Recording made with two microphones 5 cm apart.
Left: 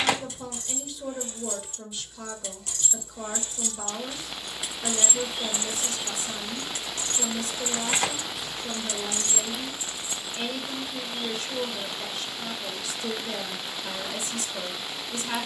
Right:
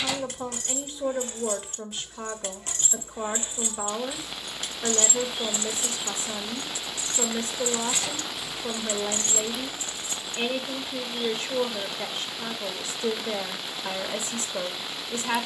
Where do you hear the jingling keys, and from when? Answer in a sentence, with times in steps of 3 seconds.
You can hear the jingling keys on the right from 0 s, in the centre from 3 s, on the left from 6 s, on the right from 9 s and not at all from 12 s.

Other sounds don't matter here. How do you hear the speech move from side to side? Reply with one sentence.
In this clip you hear the speech stay in one place.